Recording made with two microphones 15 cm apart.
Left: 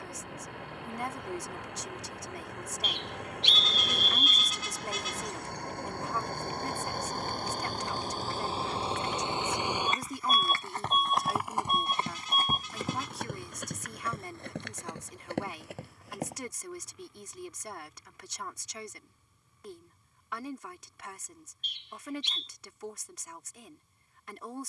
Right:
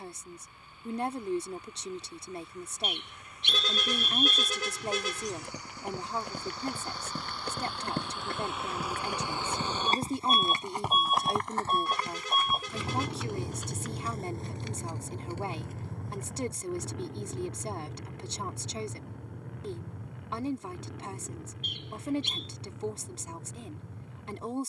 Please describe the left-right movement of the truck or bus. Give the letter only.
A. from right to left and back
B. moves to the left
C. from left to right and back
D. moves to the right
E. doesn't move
D.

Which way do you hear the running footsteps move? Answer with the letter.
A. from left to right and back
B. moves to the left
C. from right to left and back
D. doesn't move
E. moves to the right
B.